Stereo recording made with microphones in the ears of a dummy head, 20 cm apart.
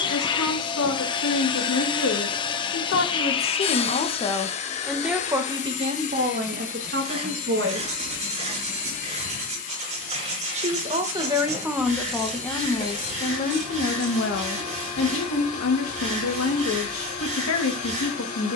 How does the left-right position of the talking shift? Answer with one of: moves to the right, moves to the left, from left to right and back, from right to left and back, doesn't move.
from left to right and back.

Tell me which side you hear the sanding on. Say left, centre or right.
right.